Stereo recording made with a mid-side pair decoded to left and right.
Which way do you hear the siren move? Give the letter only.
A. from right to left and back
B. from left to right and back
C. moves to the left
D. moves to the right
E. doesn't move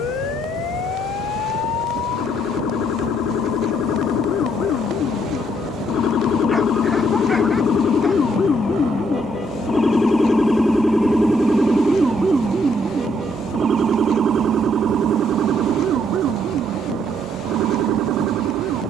D.